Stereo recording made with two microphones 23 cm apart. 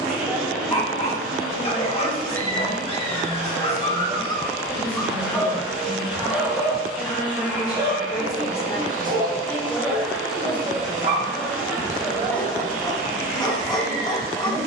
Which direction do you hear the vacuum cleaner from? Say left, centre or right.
centre.